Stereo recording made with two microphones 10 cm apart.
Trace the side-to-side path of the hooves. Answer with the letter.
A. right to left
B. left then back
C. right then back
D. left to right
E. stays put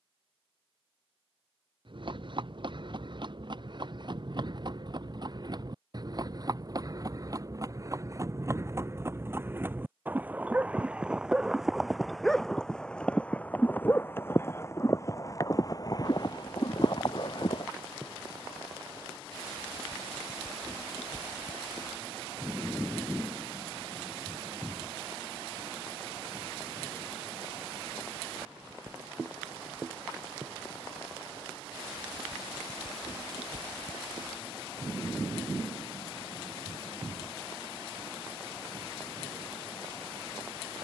A.